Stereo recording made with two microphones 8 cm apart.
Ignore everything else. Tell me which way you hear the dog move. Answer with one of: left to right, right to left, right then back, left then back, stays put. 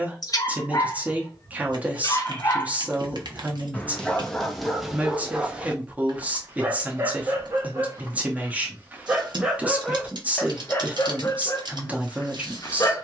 right then back.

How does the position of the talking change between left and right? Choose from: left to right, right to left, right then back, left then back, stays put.
stays put.